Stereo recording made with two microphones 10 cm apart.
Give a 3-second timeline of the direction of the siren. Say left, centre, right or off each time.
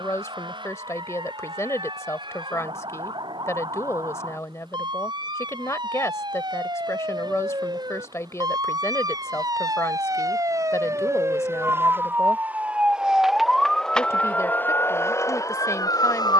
right, right, right, right, centre, left.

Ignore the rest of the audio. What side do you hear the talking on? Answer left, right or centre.
left.